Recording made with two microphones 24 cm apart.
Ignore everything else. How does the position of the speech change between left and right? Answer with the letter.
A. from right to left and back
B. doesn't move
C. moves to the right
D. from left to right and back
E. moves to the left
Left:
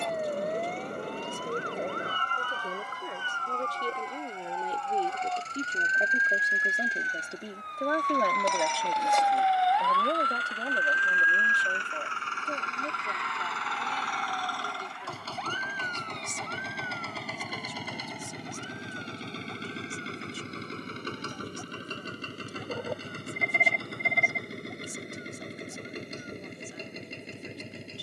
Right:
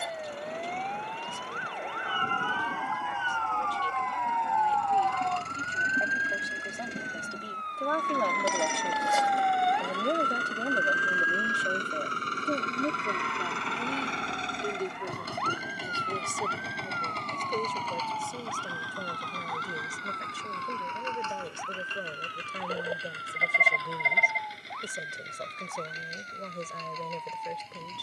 C.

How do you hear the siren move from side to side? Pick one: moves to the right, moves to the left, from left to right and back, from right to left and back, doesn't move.
moves to the right.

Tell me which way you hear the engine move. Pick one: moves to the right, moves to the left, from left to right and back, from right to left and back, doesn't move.
moves to the left.